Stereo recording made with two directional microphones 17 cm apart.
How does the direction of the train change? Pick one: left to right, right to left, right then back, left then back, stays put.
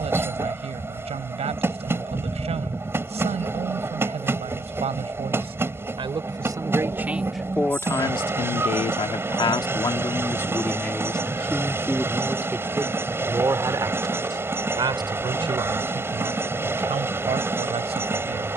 stays put.